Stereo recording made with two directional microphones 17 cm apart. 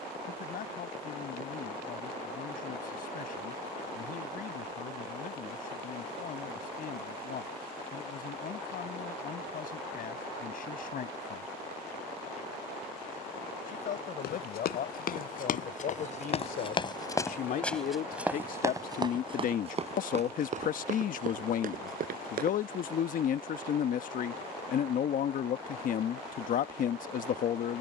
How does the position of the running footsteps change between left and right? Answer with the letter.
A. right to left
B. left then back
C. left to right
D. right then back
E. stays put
C.